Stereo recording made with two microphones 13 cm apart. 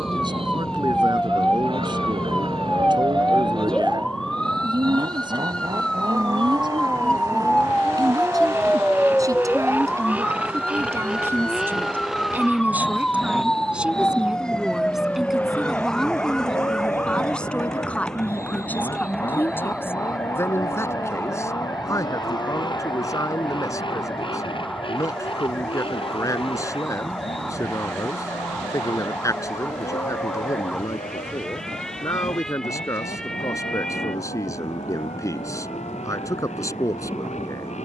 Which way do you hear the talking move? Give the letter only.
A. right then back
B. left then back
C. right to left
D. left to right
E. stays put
C.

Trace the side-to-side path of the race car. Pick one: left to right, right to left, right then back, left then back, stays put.
right to left.